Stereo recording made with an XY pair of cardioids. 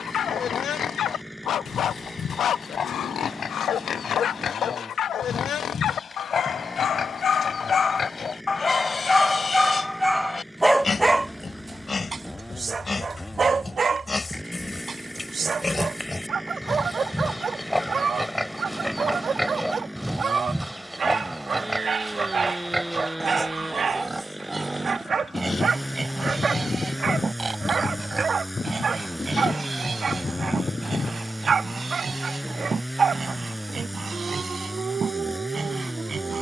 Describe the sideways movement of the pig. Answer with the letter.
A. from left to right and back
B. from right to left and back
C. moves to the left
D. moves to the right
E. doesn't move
D.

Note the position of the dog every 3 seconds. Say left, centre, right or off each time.
left, left, left, centre, right, right, right, right, right, right, right, right.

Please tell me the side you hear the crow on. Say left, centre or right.
left.